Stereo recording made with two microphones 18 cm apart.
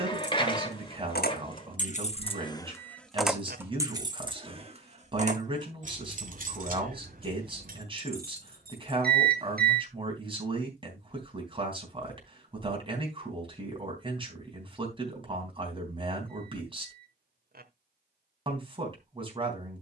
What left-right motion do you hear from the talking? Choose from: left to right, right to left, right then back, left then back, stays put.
stays put.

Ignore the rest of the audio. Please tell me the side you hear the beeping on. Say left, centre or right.
right.